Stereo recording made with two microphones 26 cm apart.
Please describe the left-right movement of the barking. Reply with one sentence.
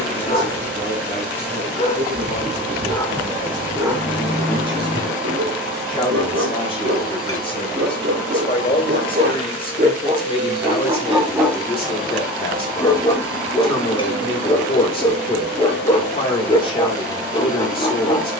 You can hear the barking move from left to right and back again.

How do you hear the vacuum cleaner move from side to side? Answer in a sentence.
In this clip you hear the vacuum cleaner stay put.